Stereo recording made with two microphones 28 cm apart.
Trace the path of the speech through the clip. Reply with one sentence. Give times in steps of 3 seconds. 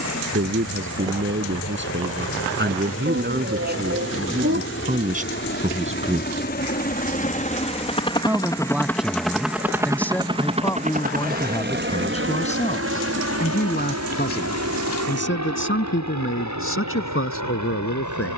You can hear the speech on the right from 0 s, in the centre from 6 s and on the left from 12 s.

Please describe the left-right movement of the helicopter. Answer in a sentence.
In this clip you hear the helicopter go from the left side to the right.